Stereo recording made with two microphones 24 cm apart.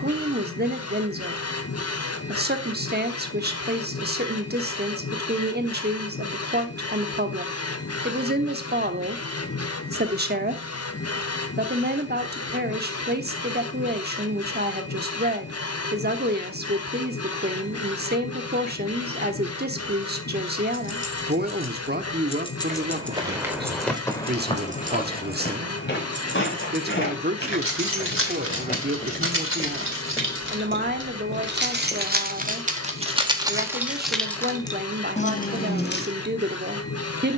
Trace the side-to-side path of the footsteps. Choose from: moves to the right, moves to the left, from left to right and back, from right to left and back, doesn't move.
from right to left and back.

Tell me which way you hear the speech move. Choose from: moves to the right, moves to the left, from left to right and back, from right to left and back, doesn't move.
doesn't move.